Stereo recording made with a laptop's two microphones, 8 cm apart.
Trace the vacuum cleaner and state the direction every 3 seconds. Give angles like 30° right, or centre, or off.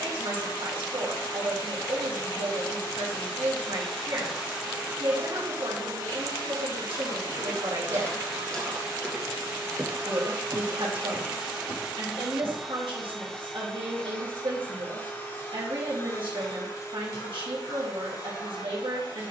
50° left, 10° right, 40° right, 20° right, 10° left, 40° left, 50° left.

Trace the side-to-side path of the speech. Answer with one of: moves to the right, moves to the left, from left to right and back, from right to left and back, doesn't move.
doesn't move.